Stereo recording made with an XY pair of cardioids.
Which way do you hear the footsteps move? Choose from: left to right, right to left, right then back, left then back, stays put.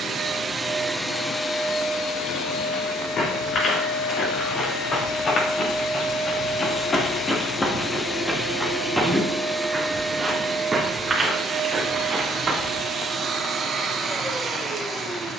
left to right.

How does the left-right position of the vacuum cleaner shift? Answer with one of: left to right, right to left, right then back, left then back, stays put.
left then back.